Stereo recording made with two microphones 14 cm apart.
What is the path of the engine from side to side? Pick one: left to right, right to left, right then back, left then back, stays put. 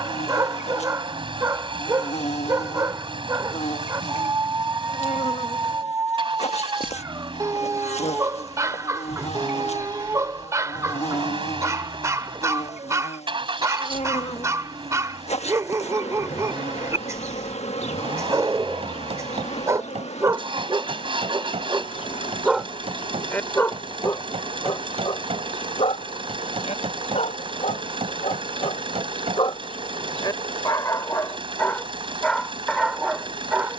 stays put.